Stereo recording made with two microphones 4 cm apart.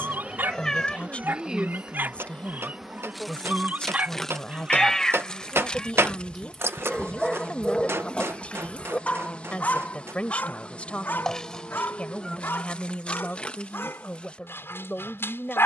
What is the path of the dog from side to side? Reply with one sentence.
You can hear the dog travel towards the left.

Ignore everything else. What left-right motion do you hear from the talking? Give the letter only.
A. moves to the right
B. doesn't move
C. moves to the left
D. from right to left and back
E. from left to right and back
B.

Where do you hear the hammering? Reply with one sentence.
In this clip you hear the hammering on the right.